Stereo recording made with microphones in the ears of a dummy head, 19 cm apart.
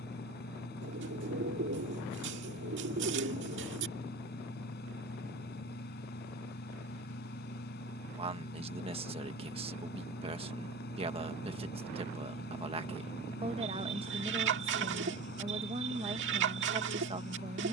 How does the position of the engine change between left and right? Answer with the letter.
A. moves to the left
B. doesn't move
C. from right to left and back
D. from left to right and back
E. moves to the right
B.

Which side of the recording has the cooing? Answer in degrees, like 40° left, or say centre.
60° right.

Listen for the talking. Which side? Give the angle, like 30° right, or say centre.
30° right.